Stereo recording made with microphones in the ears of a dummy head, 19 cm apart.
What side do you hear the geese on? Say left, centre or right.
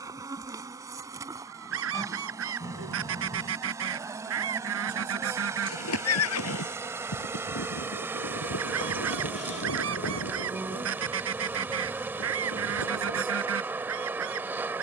right.